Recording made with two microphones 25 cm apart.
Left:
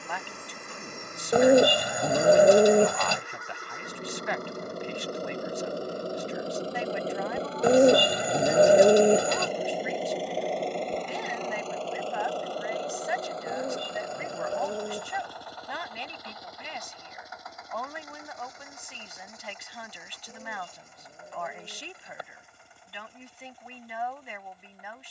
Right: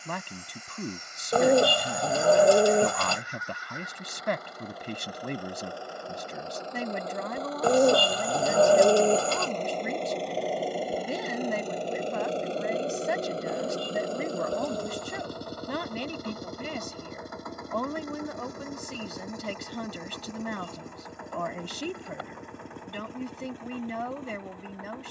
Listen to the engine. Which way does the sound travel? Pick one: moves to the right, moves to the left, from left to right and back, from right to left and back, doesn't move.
moves to the right.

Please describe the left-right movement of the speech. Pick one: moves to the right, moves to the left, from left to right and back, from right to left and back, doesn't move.
doesn't move.